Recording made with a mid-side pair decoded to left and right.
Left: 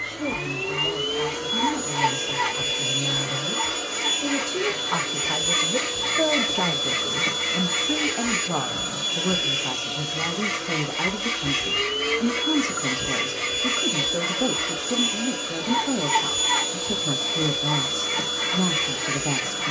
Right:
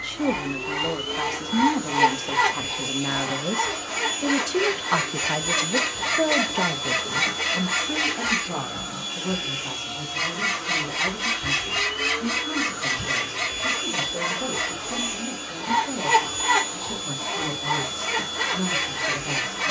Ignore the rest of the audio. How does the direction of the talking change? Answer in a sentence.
In this clip you hear the talking travel towards the left.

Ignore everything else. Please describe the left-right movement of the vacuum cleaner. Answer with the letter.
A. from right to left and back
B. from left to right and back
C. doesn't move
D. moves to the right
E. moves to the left
C.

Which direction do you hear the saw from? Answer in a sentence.
In this clip you hear the saw on the right.